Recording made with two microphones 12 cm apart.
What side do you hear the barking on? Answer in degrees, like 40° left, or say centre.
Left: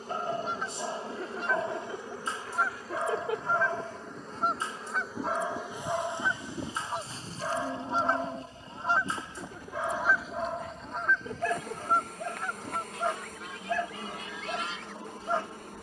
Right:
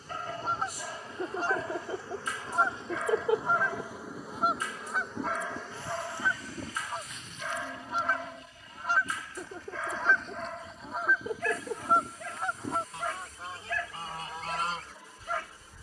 30° left.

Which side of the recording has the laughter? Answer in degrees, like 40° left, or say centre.
20° right.